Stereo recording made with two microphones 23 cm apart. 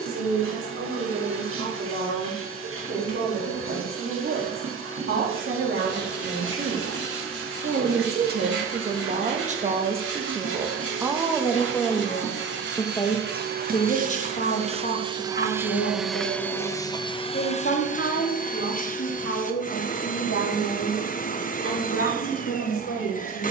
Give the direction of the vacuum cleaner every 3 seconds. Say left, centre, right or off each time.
right, right, right, right, right, centre, left, left.